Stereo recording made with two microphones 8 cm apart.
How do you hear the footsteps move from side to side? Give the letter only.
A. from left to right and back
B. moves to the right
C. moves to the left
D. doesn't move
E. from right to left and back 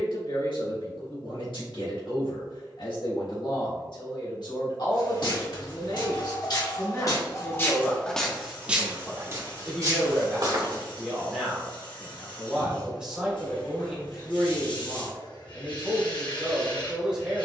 B.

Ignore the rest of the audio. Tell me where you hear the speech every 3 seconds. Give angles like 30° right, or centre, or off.
80° left, 60° left, 30° left, centre, 10° right, 10° right.